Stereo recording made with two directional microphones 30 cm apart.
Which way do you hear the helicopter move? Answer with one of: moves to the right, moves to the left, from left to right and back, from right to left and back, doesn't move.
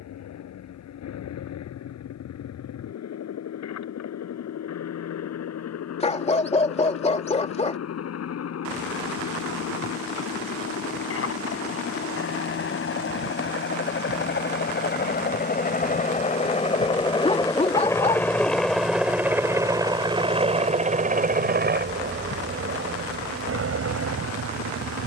moves to the right.